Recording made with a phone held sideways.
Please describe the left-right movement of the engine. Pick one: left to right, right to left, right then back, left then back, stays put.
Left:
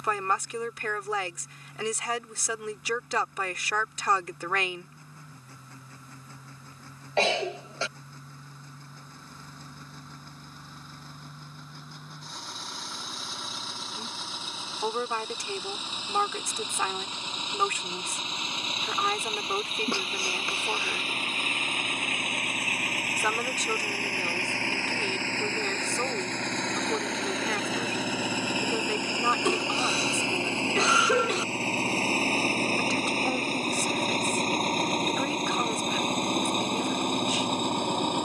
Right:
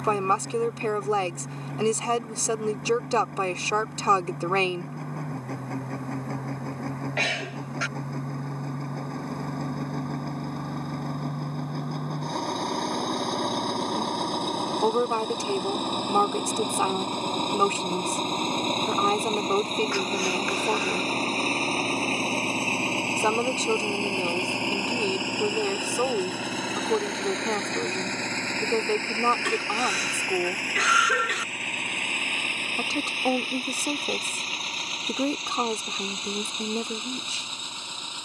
right to left.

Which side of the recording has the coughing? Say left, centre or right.
left.